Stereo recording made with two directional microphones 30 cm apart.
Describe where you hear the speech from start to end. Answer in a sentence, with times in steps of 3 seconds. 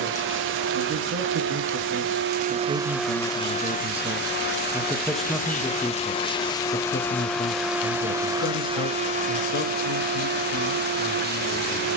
You can hear the speech on the right from 0 s, in the centre from 3 s and on the left from 6 s.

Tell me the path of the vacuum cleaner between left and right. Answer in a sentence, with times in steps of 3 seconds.
In this clip you hear the vacuum cleaner on the right from 0 s, on the left from 3 s, in the centre from 6 s and on the right from 9 s.